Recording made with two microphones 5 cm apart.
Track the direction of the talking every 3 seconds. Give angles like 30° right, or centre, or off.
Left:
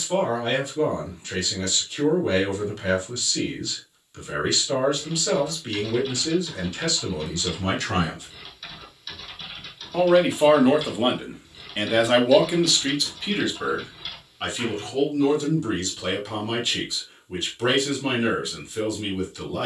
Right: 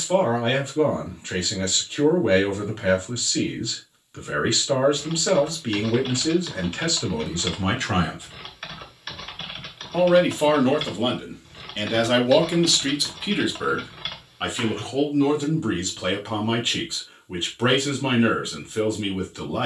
30° right, 30° right, 30° right, 10° left, 10° right, 30° right, 30° right.